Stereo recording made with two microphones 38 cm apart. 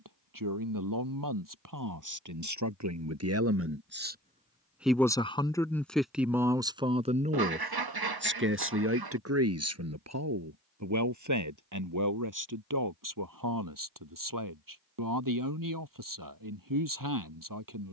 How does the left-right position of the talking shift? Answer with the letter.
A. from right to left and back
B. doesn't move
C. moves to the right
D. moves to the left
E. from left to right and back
A.